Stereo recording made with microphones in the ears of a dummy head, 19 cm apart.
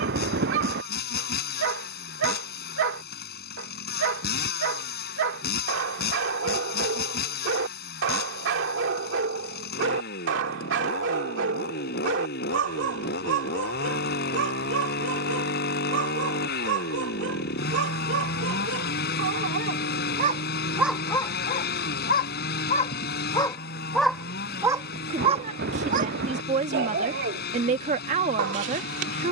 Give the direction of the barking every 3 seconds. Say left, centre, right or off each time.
right, right, right, right, right, right, right, left, right, right.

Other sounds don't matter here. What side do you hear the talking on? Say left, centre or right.
right.